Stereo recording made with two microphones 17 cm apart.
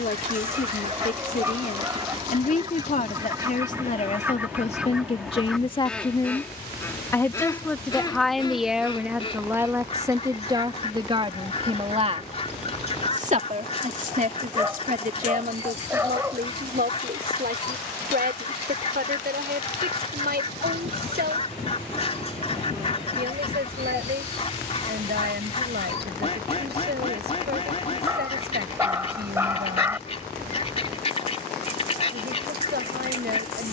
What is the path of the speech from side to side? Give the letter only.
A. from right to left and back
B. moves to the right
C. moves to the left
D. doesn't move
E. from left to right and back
B.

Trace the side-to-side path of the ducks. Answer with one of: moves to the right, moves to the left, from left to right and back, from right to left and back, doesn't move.
moves to the left.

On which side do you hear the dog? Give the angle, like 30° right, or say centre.
10° right.